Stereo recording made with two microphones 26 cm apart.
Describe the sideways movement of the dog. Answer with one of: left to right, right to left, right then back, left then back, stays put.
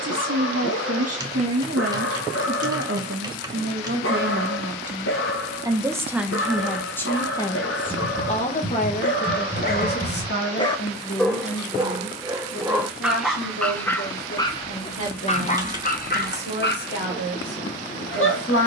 right then back.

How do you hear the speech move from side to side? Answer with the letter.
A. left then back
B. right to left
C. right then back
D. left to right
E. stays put
B.